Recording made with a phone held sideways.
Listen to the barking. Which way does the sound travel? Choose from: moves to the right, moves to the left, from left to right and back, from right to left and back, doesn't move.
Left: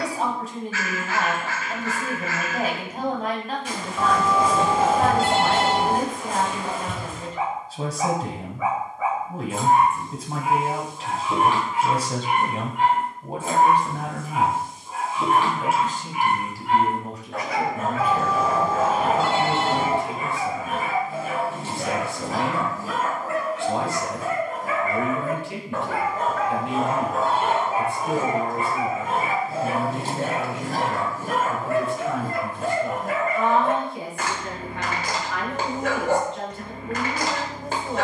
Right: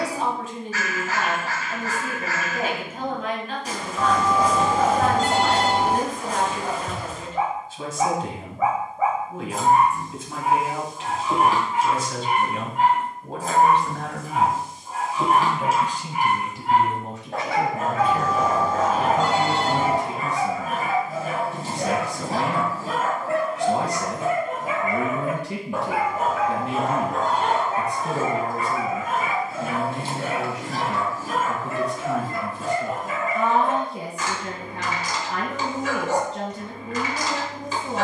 moves to the left.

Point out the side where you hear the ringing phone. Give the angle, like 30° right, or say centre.
centre.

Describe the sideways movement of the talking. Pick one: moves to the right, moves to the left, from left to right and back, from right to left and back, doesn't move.
moves to the right.